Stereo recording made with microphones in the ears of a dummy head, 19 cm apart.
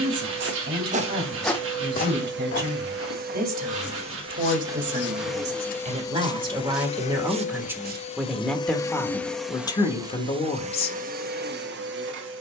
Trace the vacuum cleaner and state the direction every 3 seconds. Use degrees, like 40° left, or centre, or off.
60° right, 20° right, 30° left, 30° right.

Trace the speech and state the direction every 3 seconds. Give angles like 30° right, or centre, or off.
50° right, 40° right, 10° right, 20° left.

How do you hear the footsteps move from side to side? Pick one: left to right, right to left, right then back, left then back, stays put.
left then back.